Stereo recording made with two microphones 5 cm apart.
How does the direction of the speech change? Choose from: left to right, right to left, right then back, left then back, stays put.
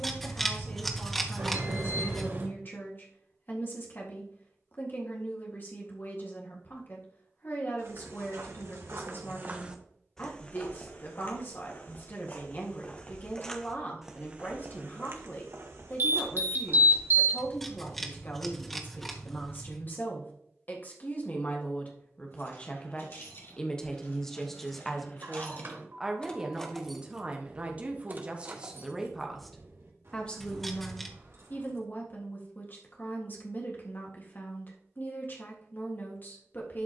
right then back.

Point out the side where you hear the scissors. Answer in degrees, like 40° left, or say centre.
centre.